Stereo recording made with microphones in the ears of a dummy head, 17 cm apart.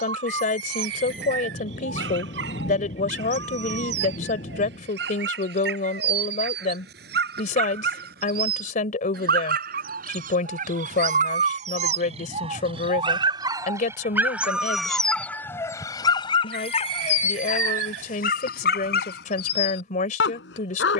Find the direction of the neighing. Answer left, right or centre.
right.